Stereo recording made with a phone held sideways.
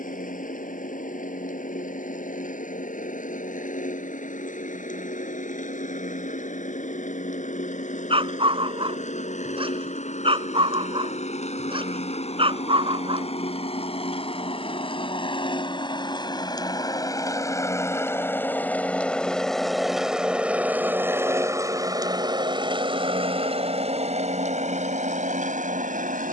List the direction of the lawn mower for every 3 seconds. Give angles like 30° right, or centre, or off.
60° left, 60° left, 50° left, 50° left, 40° left, 30° left, centre, 30° right, 50° right.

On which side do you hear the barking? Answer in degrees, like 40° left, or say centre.
40° right.